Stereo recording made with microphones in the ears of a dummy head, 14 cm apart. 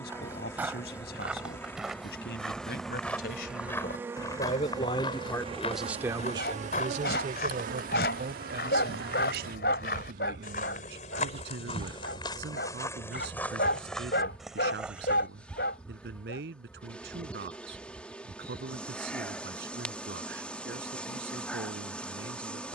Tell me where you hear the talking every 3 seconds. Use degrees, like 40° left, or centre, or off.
70° left, 40° left, 50° right, 70° right, 80° right, 80° right, 80° right, 80° right.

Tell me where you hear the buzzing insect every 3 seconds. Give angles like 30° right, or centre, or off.
10° left, 20° right, 60° right, 50° right, centre, 10° left, 10° left, 10° left.